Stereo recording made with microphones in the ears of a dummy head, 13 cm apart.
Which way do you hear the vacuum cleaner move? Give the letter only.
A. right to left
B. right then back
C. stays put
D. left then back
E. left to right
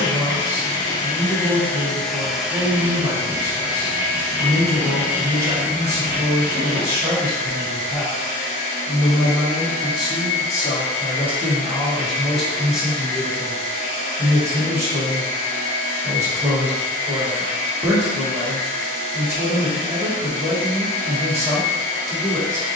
E.